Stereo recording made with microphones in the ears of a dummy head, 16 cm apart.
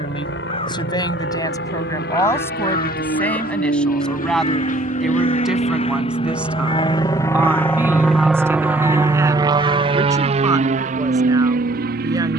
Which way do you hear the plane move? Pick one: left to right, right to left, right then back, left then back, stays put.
left to right.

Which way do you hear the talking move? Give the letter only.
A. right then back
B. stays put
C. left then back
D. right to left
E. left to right
E.